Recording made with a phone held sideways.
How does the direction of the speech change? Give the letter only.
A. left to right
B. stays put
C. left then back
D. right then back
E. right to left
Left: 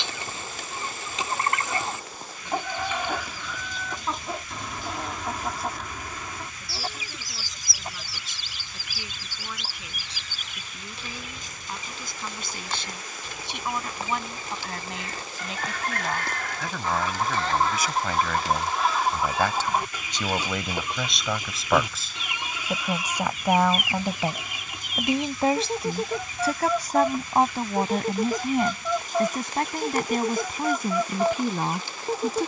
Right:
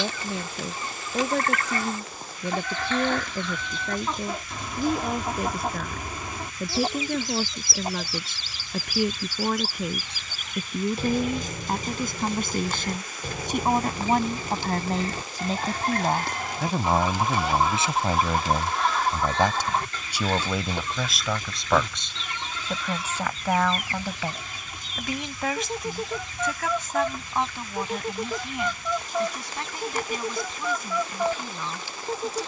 E.